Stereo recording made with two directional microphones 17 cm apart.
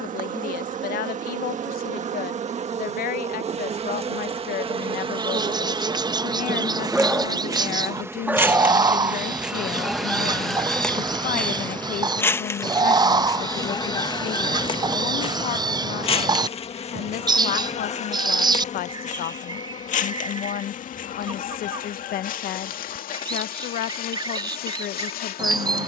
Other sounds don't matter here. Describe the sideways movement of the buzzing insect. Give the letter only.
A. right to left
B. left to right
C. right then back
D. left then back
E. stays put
A.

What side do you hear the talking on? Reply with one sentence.
In this clip you hear the talking on the left.